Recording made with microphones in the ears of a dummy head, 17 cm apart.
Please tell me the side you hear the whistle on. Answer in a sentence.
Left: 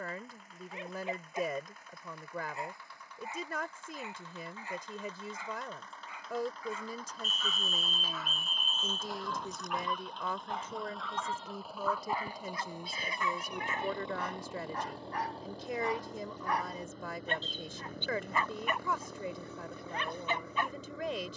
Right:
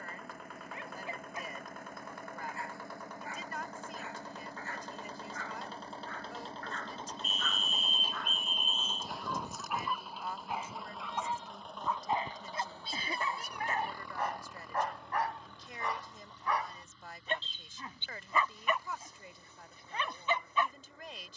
You can hear the whistle on the left.